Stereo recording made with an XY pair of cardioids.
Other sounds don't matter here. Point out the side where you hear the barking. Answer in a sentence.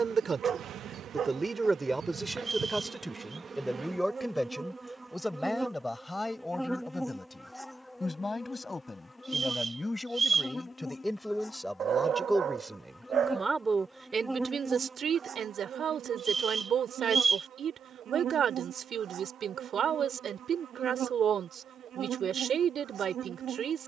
In this clip you hear the barking on the right.